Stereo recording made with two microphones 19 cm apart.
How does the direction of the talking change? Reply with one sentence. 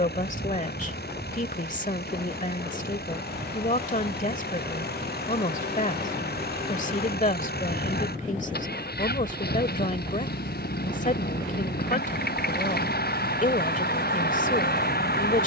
In this clip you hear the talking stay put.